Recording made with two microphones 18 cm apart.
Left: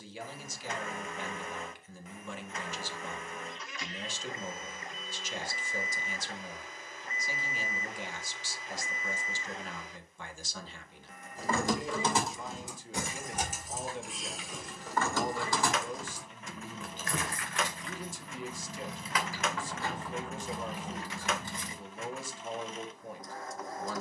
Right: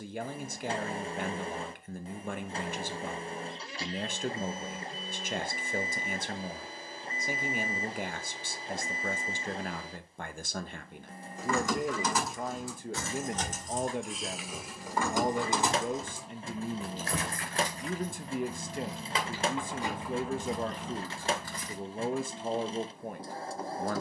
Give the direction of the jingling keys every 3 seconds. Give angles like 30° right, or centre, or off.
off, off, off, 30° left, 10° left, 30° right, 20° right, 20° left.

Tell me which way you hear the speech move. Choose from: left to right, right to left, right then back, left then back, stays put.
stays put.